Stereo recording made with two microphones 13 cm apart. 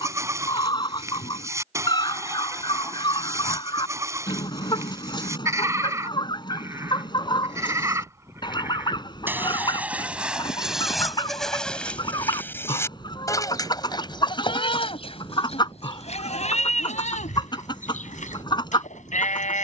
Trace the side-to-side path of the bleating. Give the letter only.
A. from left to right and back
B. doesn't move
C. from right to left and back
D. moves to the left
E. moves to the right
D.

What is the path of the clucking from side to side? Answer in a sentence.
You can hear the clucking stay in one place.